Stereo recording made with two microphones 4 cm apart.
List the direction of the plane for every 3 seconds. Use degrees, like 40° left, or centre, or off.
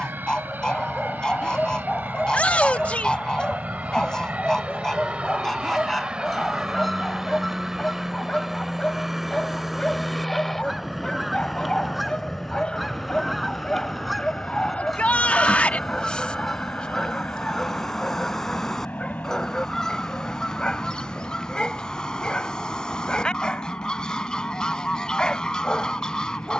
50° right, 30° right, 20° right, centre, 20° left, 30° left, 40° left, 40° left, 50° left.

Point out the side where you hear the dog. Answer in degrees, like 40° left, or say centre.
20° left.